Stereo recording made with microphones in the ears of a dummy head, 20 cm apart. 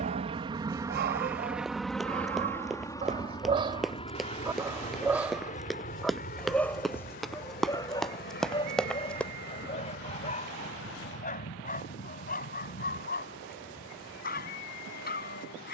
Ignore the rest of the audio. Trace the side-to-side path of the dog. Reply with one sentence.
You can hear the dog go from the right side to the left.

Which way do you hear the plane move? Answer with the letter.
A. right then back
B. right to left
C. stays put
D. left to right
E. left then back
B.